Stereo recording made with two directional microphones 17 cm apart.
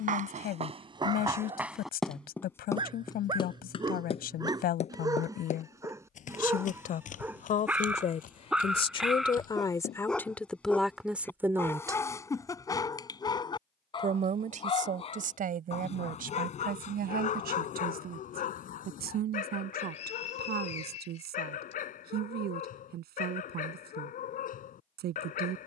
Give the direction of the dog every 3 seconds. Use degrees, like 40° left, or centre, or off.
30° right, 20° right, 10° right, 10° left, 20° left, 40° left, 50° left, 50° left, 50° left.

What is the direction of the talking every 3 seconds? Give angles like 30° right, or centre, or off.
60° left, 60° left, 50° left, 10° left, 50° right, 60° right, 70° right, 70° right, 70° right.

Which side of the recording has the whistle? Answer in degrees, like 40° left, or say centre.
40° left.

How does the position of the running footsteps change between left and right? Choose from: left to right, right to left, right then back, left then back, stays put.
right to left.